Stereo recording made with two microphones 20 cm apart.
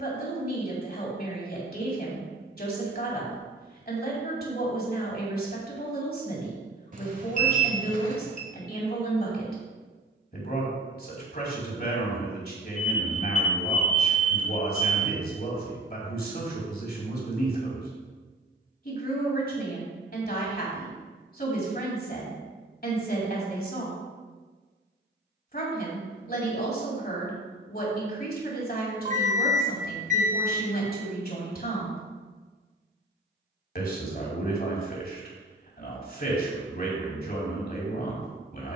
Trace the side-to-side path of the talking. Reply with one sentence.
In this clip you hear the talking stay in one place.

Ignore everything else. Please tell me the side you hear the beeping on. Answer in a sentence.
You can hear the beeping on the right.